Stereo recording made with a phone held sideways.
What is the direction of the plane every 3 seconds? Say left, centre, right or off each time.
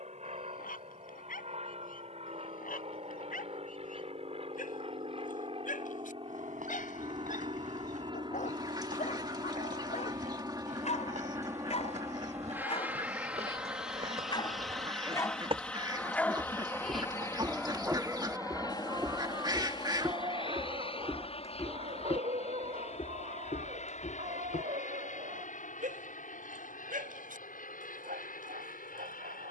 right, right, right, right, centre, centre, left, left, left, left.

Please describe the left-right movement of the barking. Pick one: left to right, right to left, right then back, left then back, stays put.
left to right.